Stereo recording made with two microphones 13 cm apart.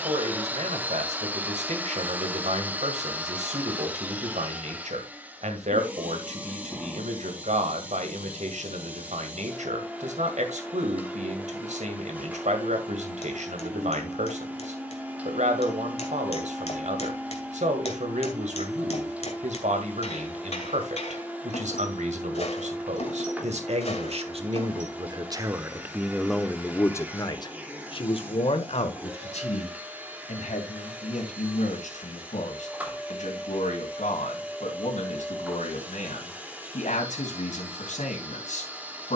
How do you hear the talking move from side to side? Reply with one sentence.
You can hear the talking go from the right side to the left.